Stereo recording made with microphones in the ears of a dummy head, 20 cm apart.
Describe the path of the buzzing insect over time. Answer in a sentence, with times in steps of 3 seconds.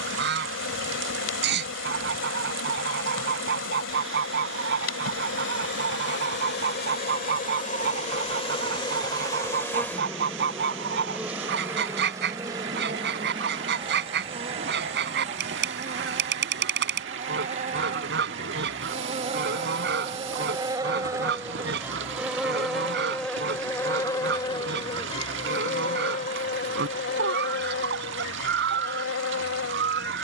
You can hear the buzzing insect on the left from 0 s, in the centre from 9 s, on the right from 12 s, in the centre from 21 s and on the left from 24 s.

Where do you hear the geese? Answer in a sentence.
In this clip you hear the geese on the right.